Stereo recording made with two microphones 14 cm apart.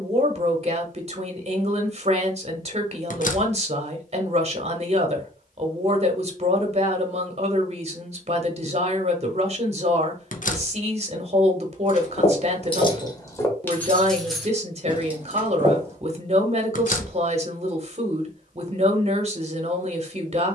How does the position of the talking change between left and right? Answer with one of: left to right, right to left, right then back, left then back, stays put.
stays put.